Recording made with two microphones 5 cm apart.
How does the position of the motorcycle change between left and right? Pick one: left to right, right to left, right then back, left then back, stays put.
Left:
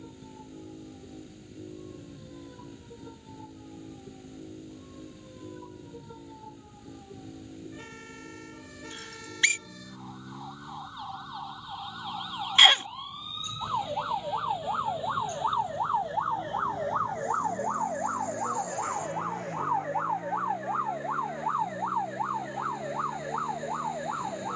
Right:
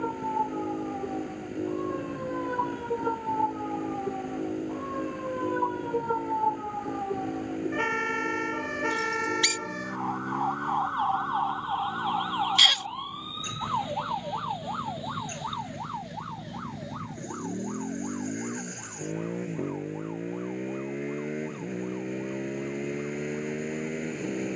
stays put.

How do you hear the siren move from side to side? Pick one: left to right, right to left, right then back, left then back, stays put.
right to left.